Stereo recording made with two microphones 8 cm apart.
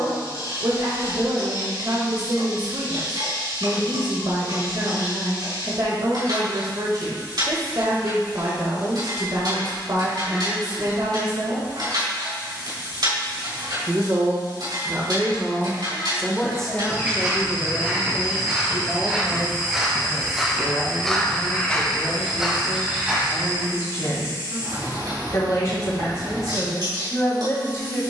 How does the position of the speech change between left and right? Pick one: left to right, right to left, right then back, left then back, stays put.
right to left.